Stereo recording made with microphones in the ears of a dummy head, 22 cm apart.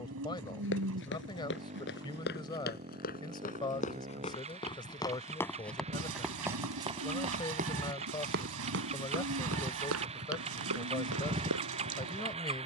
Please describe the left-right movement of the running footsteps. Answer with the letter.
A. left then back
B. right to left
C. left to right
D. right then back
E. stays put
C.